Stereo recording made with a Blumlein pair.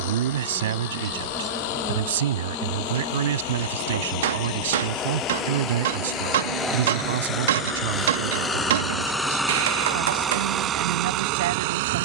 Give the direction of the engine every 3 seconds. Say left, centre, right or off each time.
left, left, left, right.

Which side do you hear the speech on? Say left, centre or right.
right.